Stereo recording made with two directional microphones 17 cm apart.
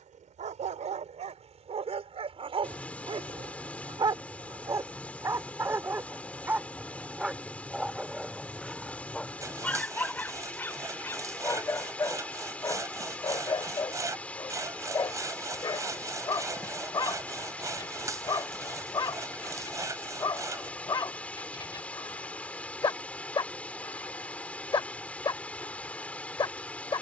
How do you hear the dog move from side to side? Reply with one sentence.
You can hear the dog move to the left.